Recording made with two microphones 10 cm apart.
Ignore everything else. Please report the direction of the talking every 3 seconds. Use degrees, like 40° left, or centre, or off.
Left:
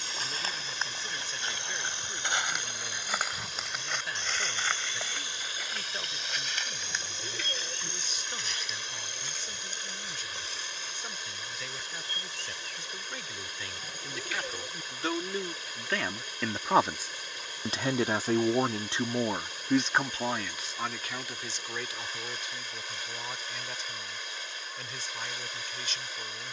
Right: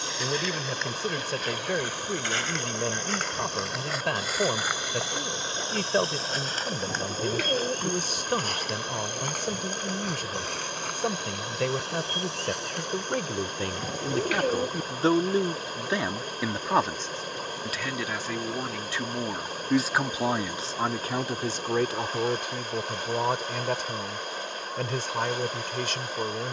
60° right, 60° right, 60° right, 60° right, 50° right, 10° right, 10° left, 60° right, 60° right.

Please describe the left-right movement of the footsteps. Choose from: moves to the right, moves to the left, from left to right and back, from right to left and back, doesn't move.
moves to the right.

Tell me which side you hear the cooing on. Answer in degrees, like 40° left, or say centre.
60° right.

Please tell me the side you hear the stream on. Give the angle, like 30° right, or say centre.
50° right.